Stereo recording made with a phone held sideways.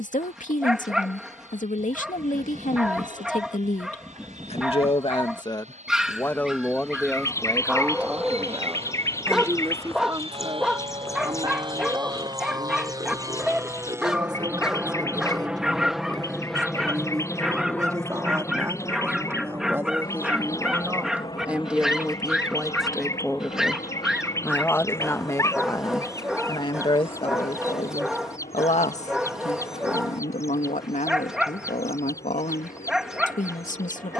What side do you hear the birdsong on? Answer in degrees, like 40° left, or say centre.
20° left.